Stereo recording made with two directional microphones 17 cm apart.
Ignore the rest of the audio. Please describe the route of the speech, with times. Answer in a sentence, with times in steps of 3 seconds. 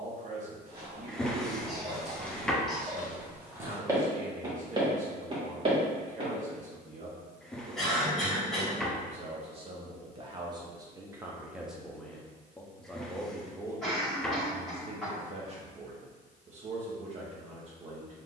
In this clip you hear the speech on the right from 0 s, in the centre from 12 s and on the right from 15 s.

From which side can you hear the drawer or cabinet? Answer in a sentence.
You can hear the drawer or cabinet in the centre.